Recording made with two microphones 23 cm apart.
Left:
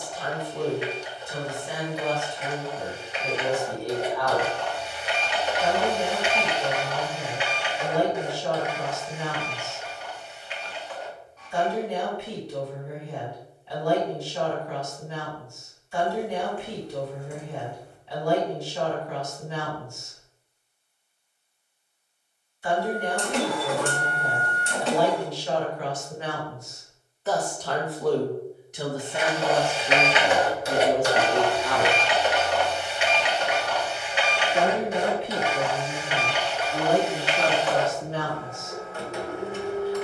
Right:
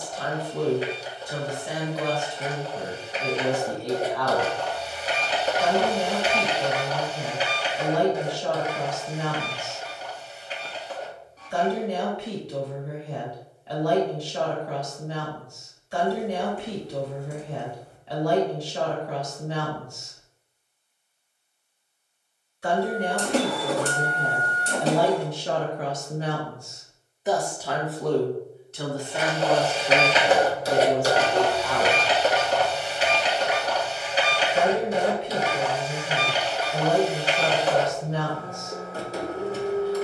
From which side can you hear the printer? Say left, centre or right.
right.